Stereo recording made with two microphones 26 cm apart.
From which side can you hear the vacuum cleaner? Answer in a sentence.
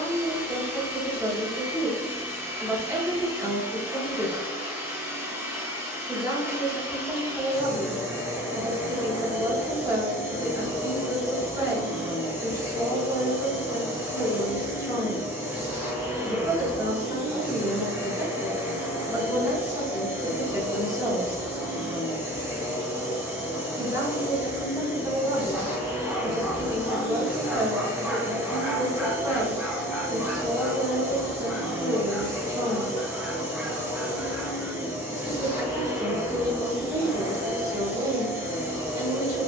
In this clip you hear the vacuum cleaner in the centre.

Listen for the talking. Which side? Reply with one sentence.
In this clip you hear the talking in the centre.